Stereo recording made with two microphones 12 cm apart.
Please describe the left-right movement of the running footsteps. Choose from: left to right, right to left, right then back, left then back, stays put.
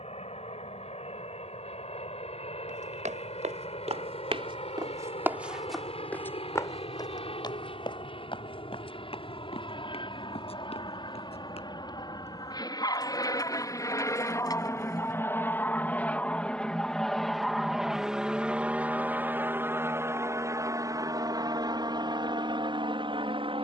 right to left.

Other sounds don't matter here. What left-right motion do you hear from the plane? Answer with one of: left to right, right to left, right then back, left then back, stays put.
left to right.